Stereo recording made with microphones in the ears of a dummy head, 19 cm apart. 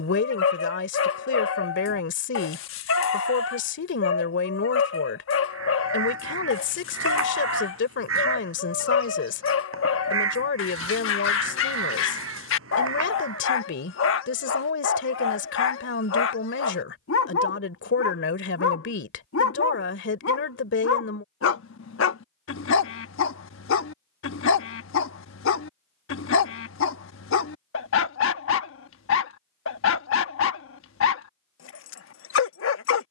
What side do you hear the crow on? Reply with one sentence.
You can hear the crow on the right.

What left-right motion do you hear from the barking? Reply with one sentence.
You can hear the barking stay put.